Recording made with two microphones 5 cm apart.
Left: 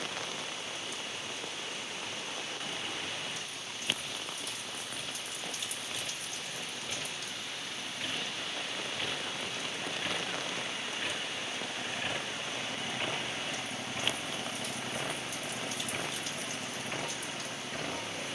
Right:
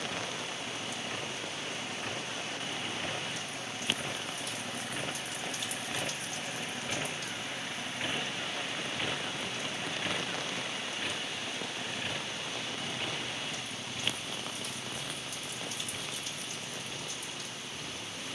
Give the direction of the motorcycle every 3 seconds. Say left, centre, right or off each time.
right, right, right, centre, left, left.